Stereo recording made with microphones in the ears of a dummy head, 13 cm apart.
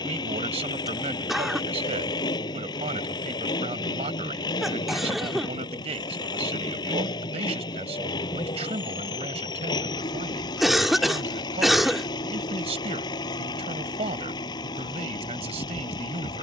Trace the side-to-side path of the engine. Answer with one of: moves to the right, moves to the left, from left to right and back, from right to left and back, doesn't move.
doesn't move.